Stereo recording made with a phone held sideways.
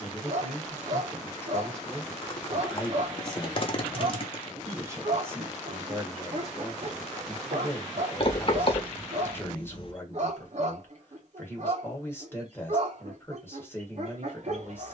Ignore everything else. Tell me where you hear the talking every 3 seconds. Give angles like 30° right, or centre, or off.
10° left, 20° right, 10° left, 20° left, 20° left.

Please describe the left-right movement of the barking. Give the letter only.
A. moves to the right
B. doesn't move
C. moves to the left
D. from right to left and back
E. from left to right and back
B.